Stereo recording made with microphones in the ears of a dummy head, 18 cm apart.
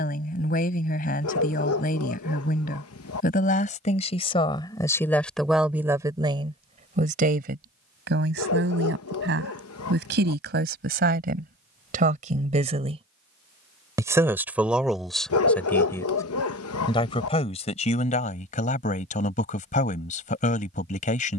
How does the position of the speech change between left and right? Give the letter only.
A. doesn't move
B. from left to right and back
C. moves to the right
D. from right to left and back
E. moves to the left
B.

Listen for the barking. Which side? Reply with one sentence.
In this clip you hear the barking on the left.